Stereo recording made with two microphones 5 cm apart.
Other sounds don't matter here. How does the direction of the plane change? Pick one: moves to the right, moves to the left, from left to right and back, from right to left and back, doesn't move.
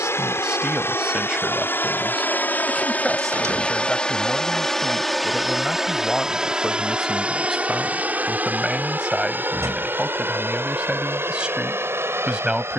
moves to the right.